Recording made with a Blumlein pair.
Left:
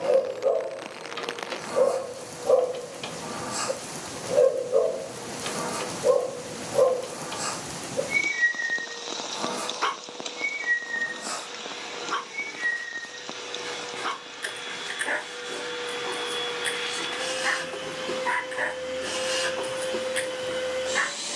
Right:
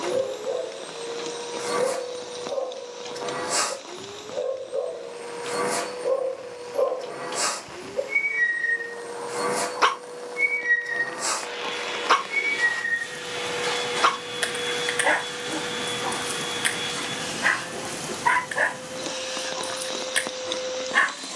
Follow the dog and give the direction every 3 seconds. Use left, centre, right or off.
left, left, centre, right, right, right, right.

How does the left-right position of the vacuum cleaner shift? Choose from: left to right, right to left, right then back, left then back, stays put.
right to left.